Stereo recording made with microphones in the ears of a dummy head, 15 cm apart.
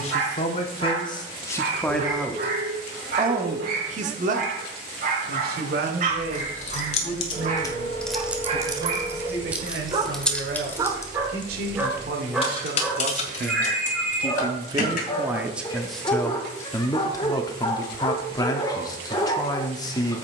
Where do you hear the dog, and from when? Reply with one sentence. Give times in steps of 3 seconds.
In this clip you hear the dog on the right from 0 s, in the centre from 12 s and on the left from 15 s.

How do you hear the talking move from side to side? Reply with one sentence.
You can hear the talking move from left to right and back again.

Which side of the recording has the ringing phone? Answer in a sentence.
In this clip you hear the ringing phone on the right.